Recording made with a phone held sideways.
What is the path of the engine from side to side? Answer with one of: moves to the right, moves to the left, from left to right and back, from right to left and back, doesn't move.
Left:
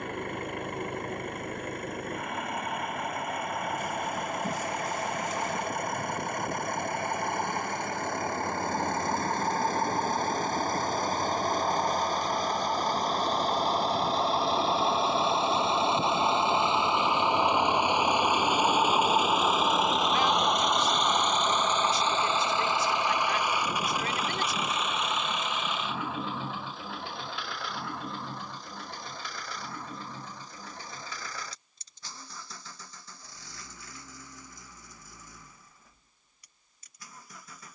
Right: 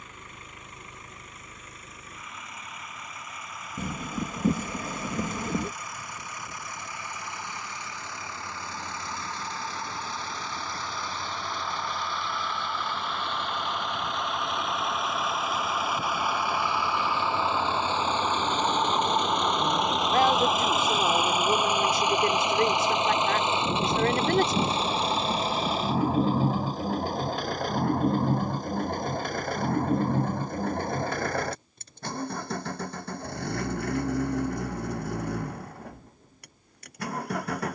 moves to the right.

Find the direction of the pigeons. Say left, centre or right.
right.